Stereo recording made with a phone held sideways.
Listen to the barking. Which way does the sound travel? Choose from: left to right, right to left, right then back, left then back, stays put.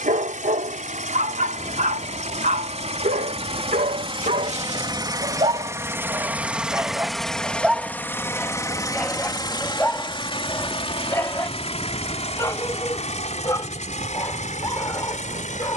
right to left.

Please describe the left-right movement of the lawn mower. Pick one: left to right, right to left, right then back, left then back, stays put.
right to left.